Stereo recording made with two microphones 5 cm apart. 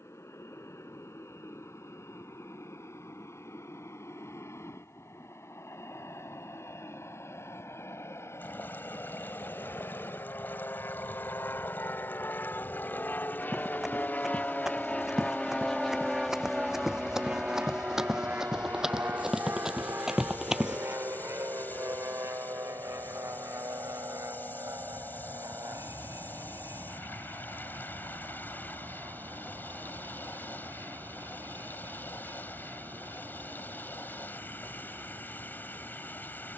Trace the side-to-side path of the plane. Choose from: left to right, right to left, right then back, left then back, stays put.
left to right.